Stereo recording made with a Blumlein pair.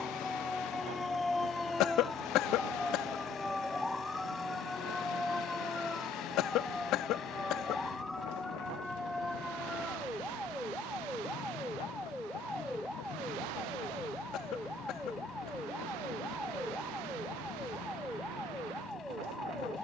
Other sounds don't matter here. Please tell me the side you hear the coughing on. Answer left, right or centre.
left.